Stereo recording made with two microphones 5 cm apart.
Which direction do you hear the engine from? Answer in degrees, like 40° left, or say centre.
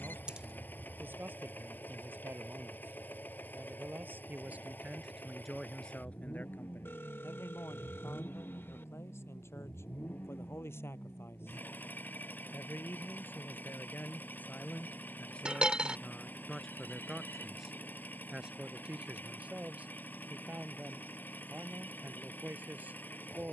40° left.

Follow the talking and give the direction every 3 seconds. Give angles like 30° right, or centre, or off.
50° right, 20° right, 60° left, 70° left, 40° left, 10° left, 30° right, 40° right.